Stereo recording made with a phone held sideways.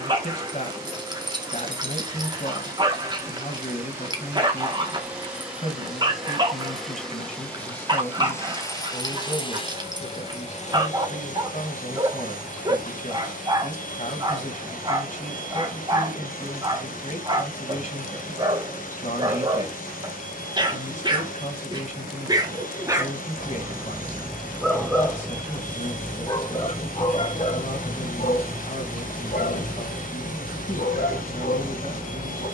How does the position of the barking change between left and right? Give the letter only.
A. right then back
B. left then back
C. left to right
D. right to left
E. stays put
D.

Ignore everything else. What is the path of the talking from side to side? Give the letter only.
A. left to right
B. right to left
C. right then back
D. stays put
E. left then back
D.